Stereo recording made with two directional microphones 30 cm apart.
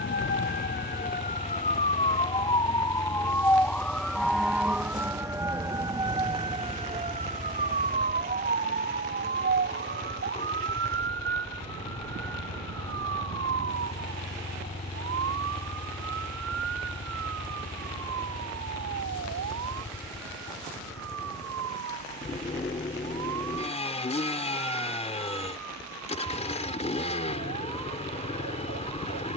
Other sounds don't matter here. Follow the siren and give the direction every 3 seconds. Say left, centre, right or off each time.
left, centre, right, right, right, right, right, right, right, right.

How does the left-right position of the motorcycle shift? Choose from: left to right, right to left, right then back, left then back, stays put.
stays put.